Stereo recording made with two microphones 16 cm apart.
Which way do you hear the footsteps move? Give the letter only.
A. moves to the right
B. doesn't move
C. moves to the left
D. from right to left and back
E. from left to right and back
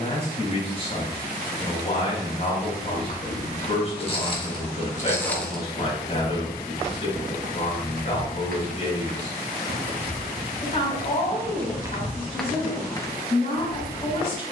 E.